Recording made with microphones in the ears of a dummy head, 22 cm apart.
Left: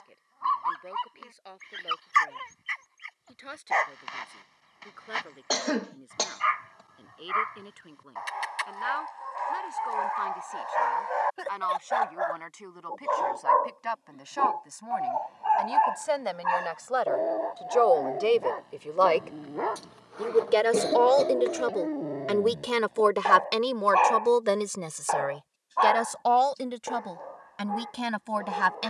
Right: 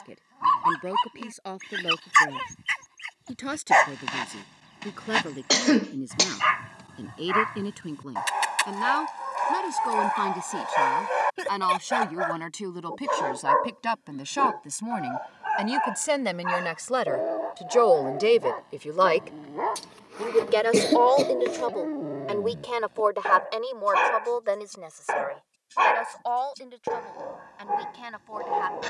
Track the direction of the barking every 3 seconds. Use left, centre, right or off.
right, right, right, right, right, centre, centre, centre, right, right.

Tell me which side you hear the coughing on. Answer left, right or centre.
right.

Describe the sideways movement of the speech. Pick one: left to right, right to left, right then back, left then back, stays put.
right to left.